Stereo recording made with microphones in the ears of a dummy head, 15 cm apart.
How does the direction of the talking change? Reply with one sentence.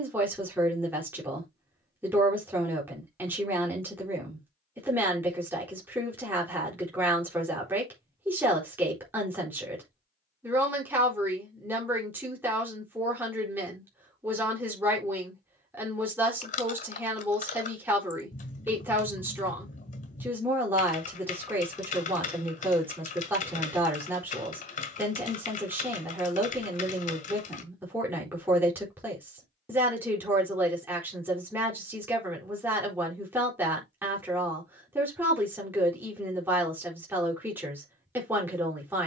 In this clip you hear the talking stay put.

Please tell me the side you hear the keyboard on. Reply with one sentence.
In this clip you hear the keyboard on the left.